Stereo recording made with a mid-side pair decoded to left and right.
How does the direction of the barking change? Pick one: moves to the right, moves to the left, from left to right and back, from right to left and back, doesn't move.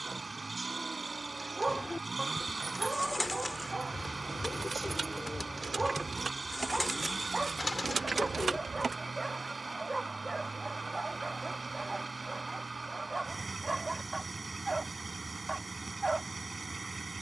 doesn't move.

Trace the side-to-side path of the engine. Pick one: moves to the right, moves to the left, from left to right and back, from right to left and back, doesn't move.
doesn't move.